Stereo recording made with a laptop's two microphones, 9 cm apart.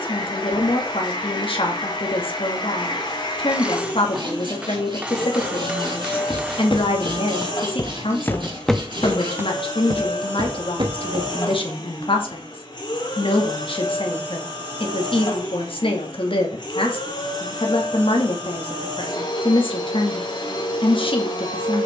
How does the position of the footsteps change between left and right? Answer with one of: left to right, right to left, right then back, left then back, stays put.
left to right.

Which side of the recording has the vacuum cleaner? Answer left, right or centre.
left.